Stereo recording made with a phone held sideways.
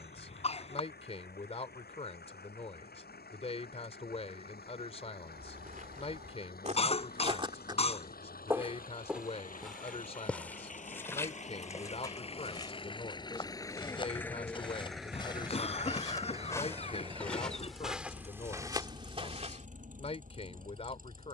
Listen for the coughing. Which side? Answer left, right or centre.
left.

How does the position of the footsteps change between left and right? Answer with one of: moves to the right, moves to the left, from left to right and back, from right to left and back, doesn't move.
from right to left and back.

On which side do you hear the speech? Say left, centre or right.
left.